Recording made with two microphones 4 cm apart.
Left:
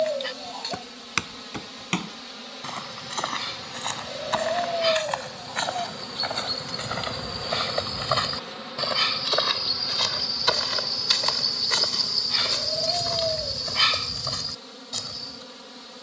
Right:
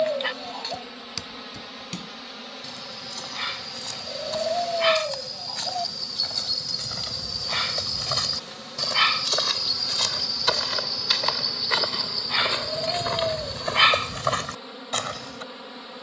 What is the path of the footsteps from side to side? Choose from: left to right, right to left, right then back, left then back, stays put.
left to right.